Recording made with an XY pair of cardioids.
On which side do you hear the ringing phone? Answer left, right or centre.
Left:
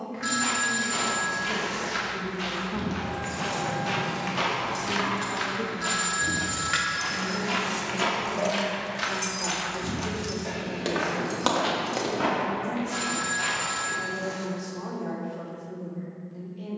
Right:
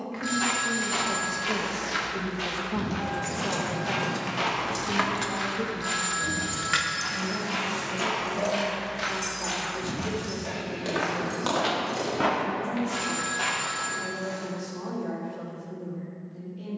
left.